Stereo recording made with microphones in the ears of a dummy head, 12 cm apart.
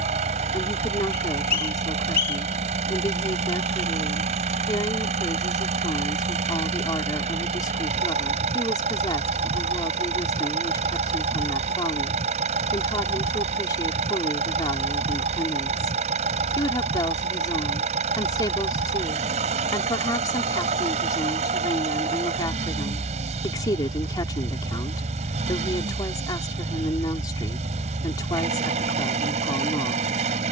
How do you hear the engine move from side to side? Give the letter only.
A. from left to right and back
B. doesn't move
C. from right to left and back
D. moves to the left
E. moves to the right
B.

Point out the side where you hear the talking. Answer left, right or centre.
left.